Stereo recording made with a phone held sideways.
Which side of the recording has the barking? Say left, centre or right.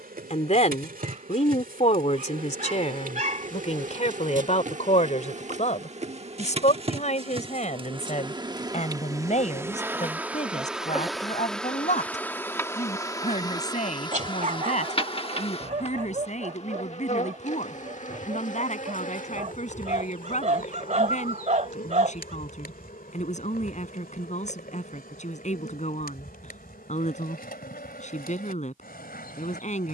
right.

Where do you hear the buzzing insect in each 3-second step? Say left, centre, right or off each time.
right, right, right, centre, left, left, left, left, left, left.